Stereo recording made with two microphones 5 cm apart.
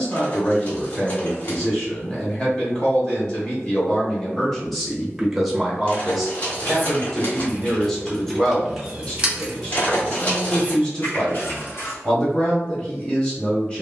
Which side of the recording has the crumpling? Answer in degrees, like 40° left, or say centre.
30° left.